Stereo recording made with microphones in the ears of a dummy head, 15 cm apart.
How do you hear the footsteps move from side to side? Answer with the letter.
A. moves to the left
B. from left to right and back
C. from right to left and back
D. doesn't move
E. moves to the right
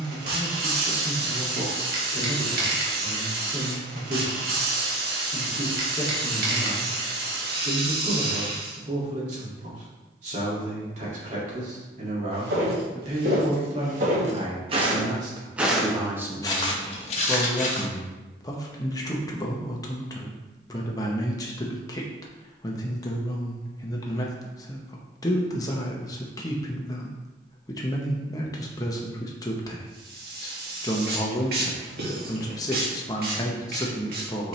A.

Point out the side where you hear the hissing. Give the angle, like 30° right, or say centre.
60° right.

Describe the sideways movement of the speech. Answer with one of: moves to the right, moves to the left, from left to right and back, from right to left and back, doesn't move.
moves to the left.